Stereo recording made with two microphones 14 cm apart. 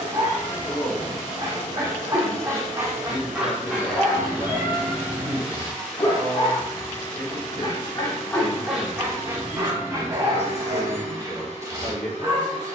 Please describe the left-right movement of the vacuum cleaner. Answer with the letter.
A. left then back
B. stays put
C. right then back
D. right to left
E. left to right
C.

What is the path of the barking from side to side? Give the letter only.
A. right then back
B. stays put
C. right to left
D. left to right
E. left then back
E.